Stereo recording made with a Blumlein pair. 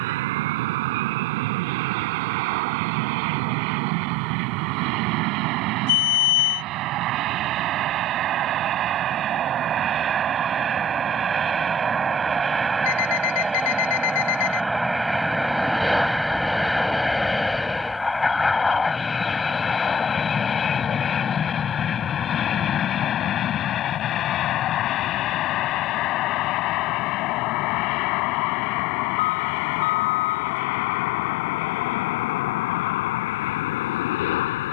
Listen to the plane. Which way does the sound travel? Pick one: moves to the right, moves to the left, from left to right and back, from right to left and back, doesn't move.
moves to the left.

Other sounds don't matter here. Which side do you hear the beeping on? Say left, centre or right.
left.